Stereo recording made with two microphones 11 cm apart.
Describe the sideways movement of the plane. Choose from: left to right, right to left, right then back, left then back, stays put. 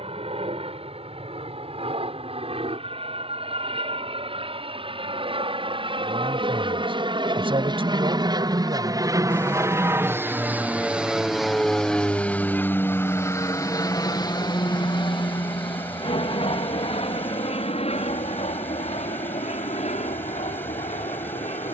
right to left.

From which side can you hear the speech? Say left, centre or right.
right.